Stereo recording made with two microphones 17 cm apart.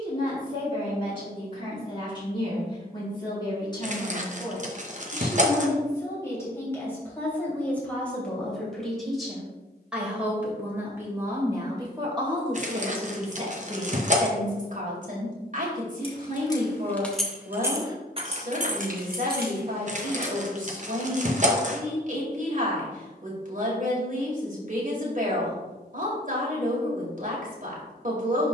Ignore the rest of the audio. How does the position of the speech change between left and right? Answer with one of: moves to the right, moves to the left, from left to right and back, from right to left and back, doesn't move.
moves to the right.